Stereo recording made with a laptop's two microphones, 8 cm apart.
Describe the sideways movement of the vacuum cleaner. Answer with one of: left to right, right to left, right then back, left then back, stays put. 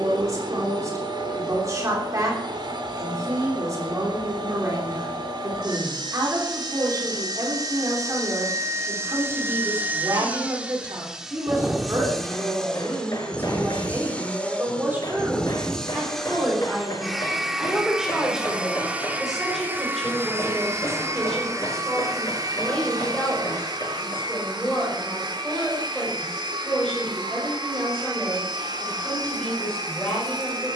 left then back.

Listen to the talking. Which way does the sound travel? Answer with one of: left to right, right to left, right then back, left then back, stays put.
right to left.